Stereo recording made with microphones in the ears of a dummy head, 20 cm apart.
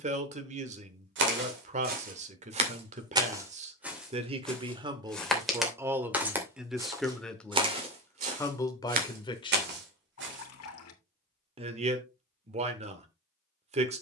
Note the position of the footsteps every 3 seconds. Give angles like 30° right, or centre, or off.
40° right, centre, 20° right, 50° right, off.